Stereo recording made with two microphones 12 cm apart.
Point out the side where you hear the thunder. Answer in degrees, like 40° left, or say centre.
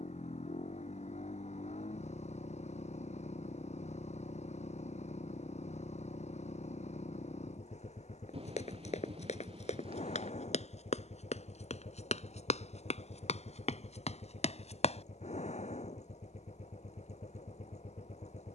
50° right.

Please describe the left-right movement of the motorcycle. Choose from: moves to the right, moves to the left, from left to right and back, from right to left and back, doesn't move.
doesn't move.